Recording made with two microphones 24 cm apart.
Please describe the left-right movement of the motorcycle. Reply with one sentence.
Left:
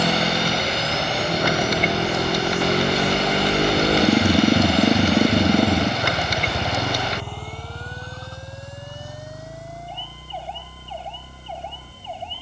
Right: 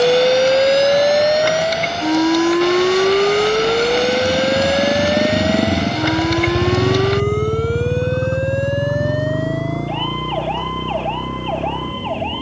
You can hear the motorcycle move from left to right.